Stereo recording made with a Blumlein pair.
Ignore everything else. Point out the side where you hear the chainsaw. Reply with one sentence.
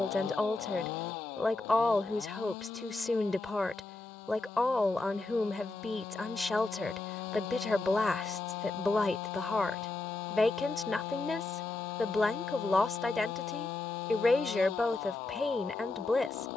In this clip you hear the chainsaw on the left.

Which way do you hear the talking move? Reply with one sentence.
You can hear the talking stay put.